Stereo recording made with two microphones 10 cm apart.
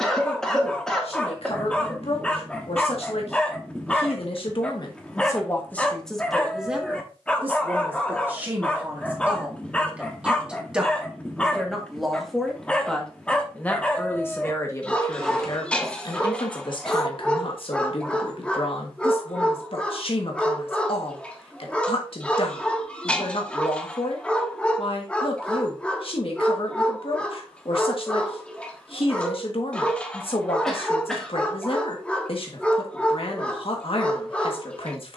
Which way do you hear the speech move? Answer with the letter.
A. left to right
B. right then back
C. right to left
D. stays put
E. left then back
B.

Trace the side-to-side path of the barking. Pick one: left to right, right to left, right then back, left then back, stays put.
stays put.